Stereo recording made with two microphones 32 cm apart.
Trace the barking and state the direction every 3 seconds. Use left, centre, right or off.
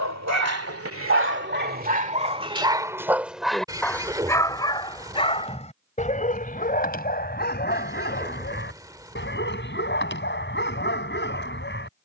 right, centre, left, left.